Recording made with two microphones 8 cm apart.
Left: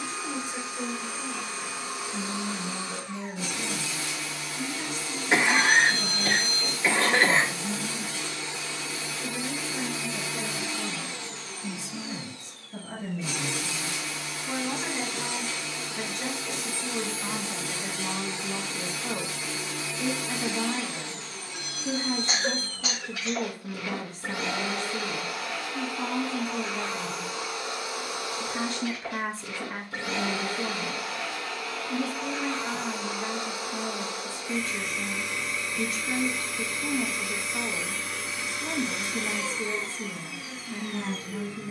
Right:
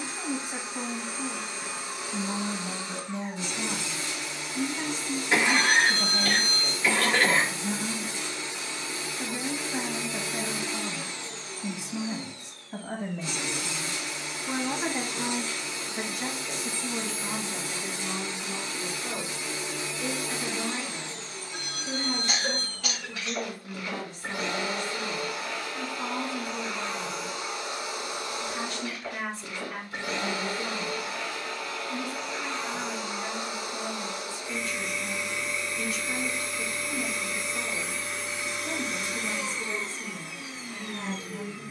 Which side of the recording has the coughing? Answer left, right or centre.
left.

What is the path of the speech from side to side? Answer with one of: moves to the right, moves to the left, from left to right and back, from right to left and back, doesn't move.
moves to the left.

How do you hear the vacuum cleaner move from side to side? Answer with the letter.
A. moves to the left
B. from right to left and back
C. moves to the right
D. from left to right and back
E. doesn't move
E.